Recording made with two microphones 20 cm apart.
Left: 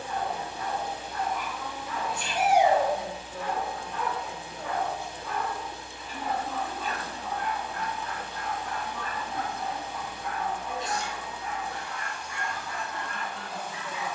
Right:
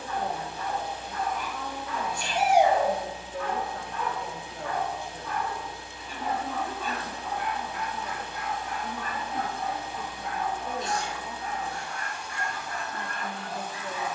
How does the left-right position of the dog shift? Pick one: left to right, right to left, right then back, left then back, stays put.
left to right.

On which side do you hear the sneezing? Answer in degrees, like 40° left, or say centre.
40° right.